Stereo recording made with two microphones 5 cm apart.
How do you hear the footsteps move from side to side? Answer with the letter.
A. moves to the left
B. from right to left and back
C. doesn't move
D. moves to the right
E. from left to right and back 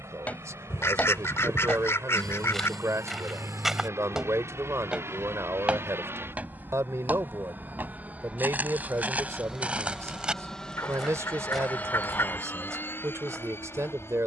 E.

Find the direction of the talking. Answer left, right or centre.
right.